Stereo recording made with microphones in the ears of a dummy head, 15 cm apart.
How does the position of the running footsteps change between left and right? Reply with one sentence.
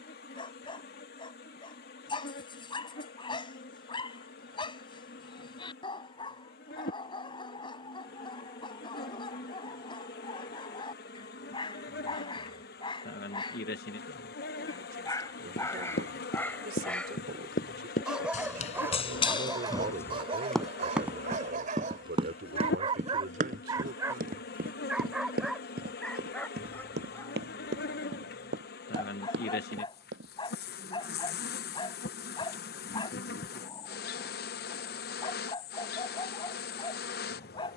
In this clip you hear the running footsteps travel towards the right.